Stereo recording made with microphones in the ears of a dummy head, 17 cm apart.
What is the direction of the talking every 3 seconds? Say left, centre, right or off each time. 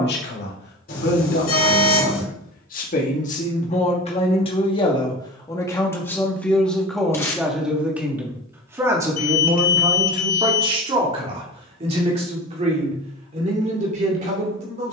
left, left, centre, right, right.